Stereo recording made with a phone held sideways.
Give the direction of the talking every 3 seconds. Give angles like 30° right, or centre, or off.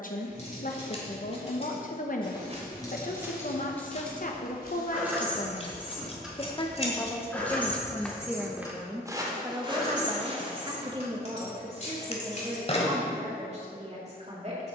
60° left, 50° left, 10° left, 30° right, 40° right.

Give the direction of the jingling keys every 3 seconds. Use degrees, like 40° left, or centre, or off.
40° left, centre, 10° left, 40° left, 50° left.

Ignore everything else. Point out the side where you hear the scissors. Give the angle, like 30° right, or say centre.
40° left.